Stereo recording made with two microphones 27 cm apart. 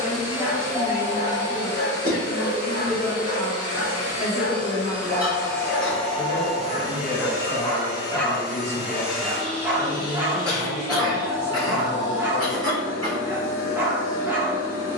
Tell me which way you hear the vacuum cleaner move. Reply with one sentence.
You can hear the vacuum cleaner move from left to right and back again.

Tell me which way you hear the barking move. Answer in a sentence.
In this clip you hear the barking move from right to left and back again.